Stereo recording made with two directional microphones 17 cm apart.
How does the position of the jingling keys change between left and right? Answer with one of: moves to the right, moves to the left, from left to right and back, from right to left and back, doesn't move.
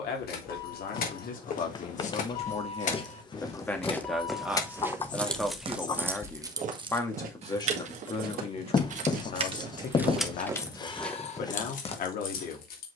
from left to right and back.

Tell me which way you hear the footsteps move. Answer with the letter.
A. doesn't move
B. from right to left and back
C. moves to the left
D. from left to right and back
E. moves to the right
D.